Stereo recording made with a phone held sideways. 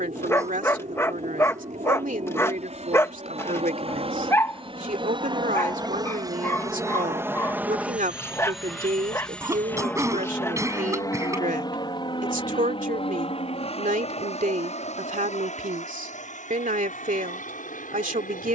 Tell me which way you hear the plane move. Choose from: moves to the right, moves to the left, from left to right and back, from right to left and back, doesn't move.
moves to the left.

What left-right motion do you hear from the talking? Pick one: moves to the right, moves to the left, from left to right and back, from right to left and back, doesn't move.
doesn't move.